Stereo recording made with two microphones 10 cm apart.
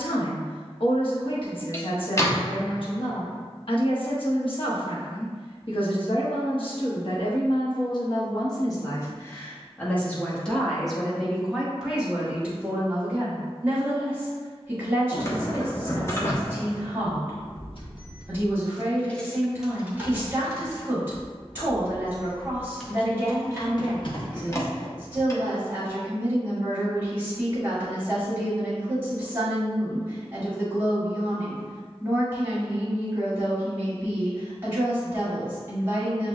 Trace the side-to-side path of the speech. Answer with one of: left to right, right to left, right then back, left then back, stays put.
left to right.